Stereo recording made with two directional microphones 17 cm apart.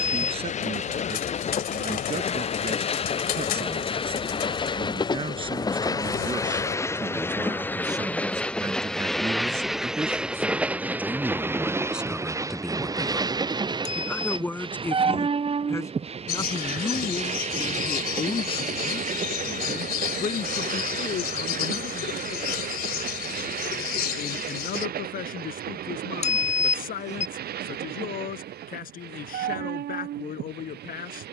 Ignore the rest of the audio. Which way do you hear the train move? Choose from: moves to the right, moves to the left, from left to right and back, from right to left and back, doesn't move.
moves to the right.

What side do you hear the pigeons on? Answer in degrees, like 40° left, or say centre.
60° left.